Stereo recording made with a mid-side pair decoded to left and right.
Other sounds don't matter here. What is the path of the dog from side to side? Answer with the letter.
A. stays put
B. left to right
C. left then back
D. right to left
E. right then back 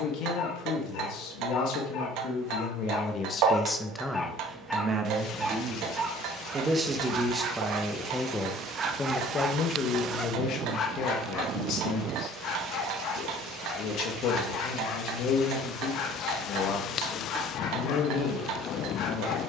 E.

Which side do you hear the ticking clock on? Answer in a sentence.
You can hear the ticking clock on the right.